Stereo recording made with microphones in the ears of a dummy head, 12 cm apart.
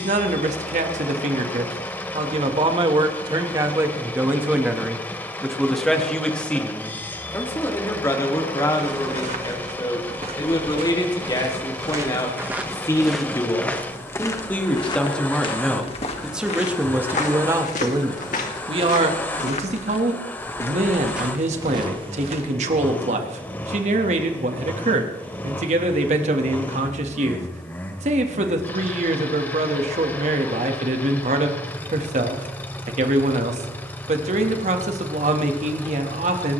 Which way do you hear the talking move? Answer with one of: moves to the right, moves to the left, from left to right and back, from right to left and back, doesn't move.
from right to left and back.